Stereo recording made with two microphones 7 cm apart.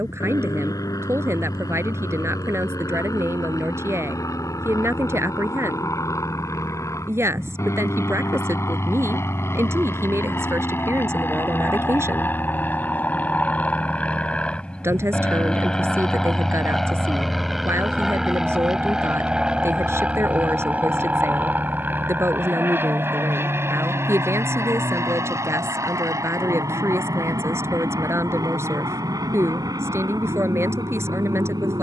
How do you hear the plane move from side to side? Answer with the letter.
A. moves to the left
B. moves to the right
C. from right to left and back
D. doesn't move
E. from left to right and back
B.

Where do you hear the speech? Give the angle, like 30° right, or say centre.
40° right.